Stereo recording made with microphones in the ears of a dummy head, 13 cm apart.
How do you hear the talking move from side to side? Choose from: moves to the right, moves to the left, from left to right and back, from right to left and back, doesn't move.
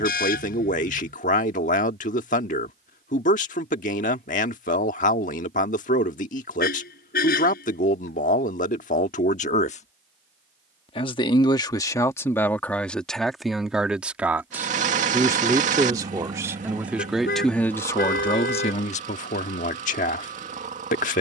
from left to right and back.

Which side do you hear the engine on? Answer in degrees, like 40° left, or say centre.
50° right.